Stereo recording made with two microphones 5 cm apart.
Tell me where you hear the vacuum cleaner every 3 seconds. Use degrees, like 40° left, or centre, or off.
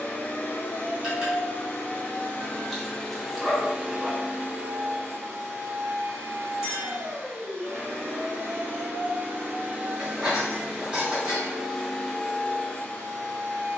30° left, 30° right, 50° right, 20° right, 20° left.